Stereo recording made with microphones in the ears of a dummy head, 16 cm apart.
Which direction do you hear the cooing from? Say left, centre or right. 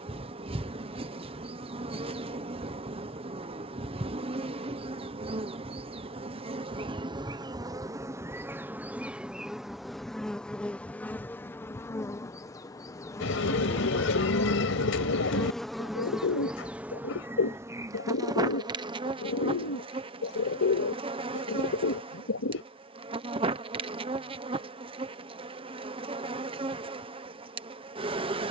left.